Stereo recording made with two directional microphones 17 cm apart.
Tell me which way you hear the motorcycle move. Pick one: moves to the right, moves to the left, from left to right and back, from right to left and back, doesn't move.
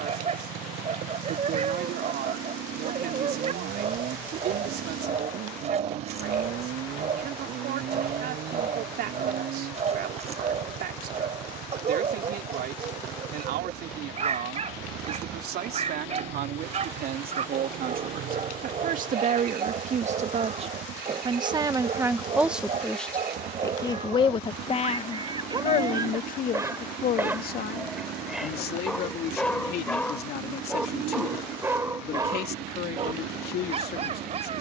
doesn't move.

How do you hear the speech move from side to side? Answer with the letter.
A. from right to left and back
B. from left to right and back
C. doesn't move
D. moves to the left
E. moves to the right
D.